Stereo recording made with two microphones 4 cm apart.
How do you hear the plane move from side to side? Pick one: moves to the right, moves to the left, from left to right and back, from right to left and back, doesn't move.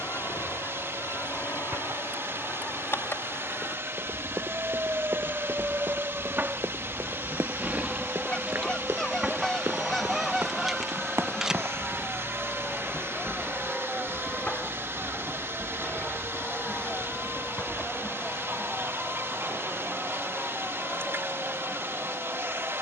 moves to the left.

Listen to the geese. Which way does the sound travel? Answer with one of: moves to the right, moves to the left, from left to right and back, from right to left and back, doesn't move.
moves to the right.